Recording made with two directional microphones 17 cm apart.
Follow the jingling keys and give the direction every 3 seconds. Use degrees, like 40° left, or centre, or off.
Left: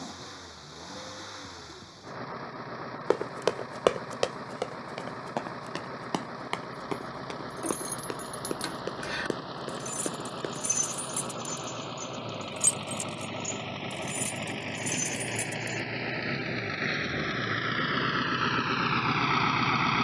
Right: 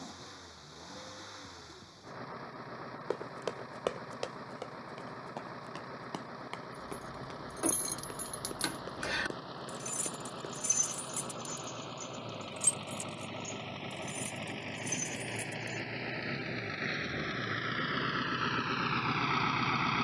off, off, 10° right, 20° left, 40° left, 60° left, off.